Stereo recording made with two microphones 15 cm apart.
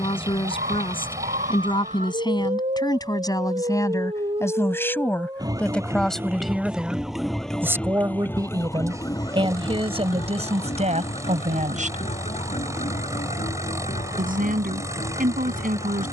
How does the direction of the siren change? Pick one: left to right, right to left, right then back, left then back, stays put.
right to left.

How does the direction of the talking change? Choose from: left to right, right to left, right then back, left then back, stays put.
left to right.